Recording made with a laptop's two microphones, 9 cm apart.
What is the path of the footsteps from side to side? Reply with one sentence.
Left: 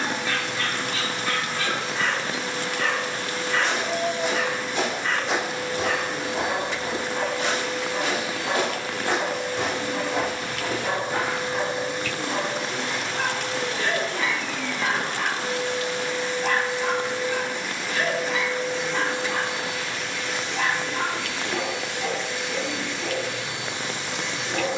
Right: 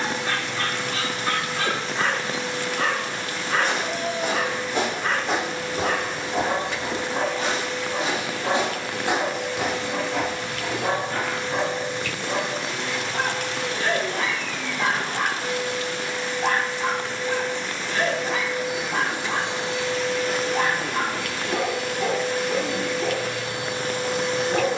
You can hear the footsteps move from right to left.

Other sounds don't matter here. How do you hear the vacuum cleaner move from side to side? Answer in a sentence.
In this clip you hear the vacuum cleaner move from left to right.